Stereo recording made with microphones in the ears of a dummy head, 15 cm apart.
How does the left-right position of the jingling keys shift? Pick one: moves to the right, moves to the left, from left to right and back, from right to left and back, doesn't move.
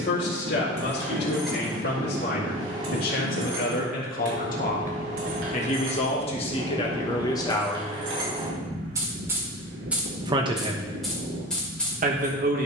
from left to right and back.